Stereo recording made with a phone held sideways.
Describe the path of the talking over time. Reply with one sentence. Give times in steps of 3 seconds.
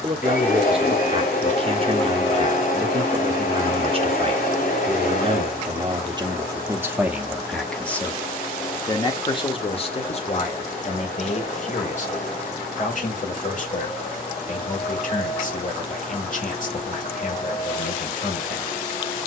You can hear the talking on the right from 0 s, in the centre from 6 s and on the left from 9 s.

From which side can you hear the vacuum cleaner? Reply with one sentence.
You can hear the vacuum cleaner on the left.